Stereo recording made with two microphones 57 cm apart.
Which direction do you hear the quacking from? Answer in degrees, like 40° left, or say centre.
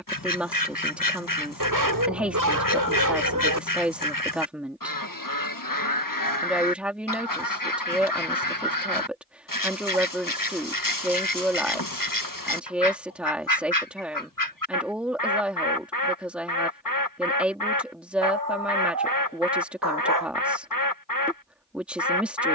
30° left.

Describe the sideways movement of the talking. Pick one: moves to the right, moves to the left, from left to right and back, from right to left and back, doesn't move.
doesn't move.